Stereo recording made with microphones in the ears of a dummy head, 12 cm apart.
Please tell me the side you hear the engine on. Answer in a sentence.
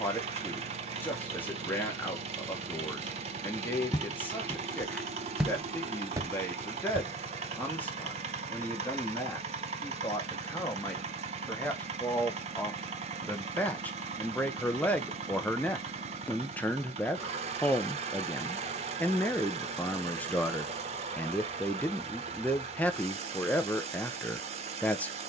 You can hear the engine on the right.